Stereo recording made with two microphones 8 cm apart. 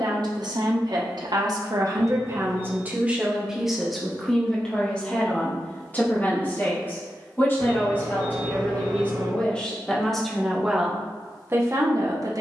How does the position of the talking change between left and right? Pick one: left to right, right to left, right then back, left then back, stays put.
left then back.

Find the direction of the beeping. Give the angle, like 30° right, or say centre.
70° right.